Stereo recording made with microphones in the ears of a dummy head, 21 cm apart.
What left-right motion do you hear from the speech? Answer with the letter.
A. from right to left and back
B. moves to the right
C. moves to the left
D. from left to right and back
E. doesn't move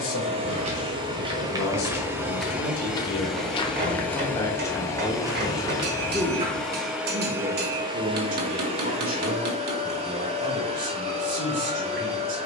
B.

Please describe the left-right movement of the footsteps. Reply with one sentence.
In this clip you hear the footsteps move from right to left and back again.